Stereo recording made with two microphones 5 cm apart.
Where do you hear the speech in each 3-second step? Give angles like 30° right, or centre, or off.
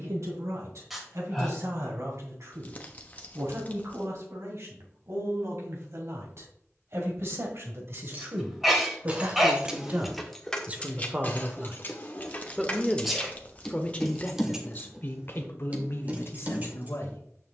70° right, 60° right, 50° right, 30° right, 20° left, 50° left.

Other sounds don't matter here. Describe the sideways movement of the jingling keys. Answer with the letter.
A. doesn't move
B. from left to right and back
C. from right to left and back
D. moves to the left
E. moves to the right
C.